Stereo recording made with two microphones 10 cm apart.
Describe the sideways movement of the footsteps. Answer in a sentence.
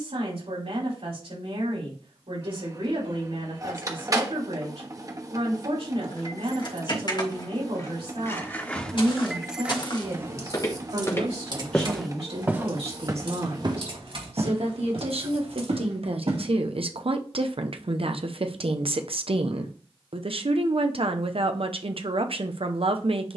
In this clip you hear the footsteps move from left to right.